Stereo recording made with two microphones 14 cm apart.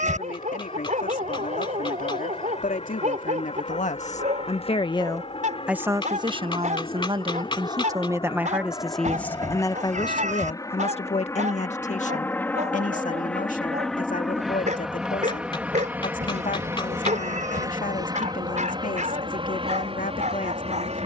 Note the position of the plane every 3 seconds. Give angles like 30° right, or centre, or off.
50° left, 50° left, 40° left, 30° left, 10° left, 20° right, 40° right.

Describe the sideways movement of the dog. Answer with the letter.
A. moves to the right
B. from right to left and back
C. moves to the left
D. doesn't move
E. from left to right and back
D.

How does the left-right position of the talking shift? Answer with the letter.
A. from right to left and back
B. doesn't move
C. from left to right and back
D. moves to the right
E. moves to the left
C.